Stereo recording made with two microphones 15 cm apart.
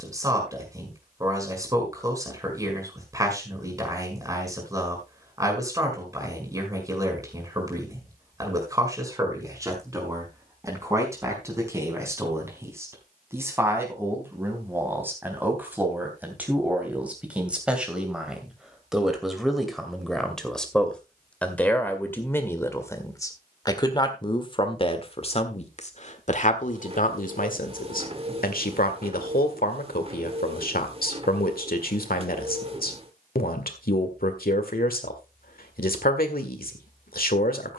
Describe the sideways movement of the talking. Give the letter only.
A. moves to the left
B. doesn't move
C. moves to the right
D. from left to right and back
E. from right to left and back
A.